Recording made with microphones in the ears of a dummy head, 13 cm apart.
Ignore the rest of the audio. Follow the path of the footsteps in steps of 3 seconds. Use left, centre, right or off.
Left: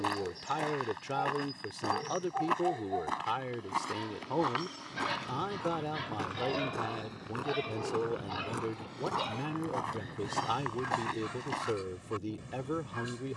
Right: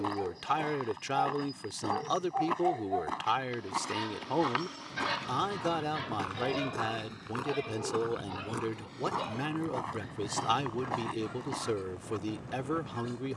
left, centre, centre, left, off.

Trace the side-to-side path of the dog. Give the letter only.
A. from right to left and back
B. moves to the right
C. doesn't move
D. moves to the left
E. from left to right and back
D.